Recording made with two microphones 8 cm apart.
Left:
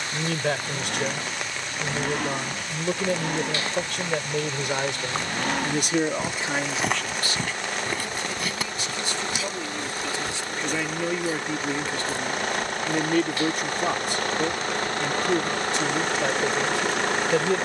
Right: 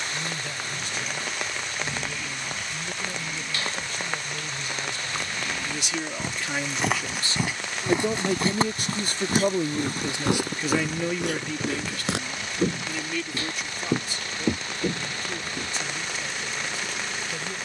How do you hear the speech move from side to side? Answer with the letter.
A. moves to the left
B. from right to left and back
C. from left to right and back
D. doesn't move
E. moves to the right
C.